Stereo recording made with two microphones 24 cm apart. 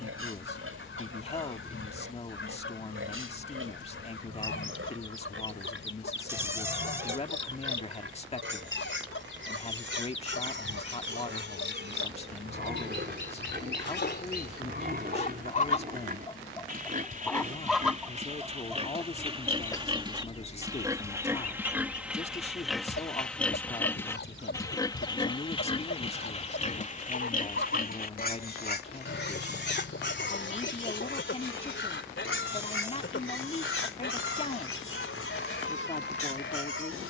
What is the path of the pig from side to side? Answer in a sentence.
You can hear the pig move from right to left.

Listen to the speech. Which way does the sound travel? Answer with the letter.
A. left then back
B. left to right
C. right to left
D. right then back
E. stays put
E.